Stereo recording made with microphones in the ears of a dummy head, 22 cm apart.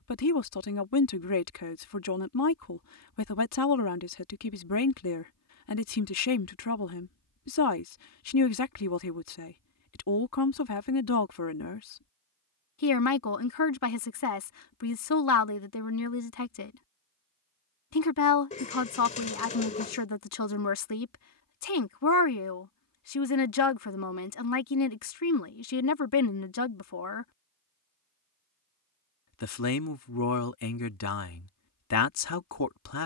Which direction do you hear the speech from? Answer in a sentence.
In this clip you hear the speech on the left.